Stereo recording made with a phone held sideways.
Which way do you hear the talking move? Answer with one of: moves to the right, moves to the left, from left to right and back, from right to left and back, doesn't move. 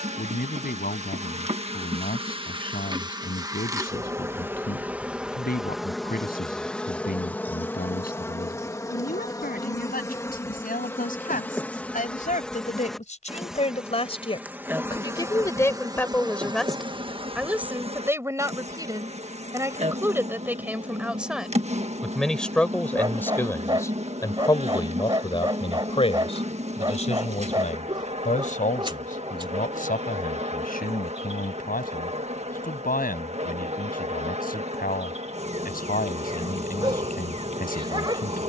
from left to right and back.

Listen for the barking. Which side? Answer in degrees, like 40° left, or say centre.
30° right.